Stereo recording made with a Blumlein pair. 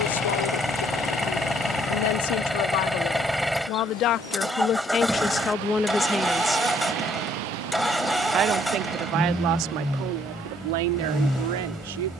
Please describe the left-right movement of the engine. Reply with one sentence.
In this clip you hear the engine stay in one place.